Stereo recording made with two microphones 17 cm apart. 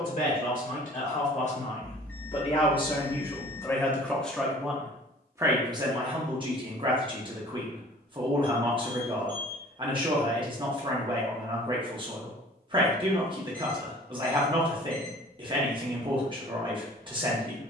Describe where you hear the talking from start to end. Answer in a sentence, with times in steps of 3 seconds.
In this clip you hear the talking on the left from 0 s, in the centre from 3 s and on the right from 6 s.